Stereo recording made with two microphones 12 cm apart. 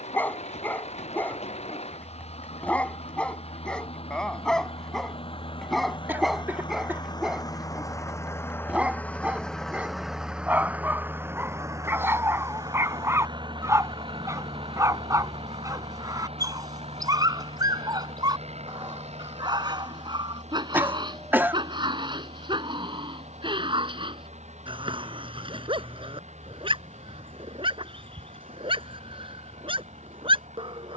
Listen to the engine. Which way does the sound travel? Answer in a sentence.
You can hear the engine move from left to right.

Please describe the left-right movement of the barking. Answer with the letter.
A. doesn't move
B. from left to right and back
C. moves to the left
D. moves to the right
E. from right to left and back
D.